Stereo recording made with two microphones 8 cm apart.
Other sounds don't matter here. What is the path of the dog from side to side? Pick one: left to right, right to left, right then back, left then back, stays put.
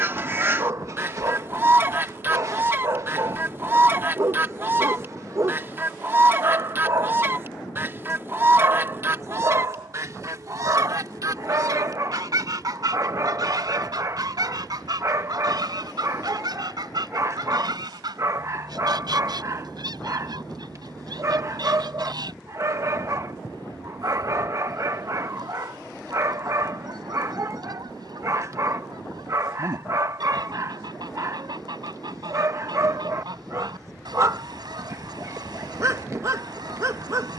stays put.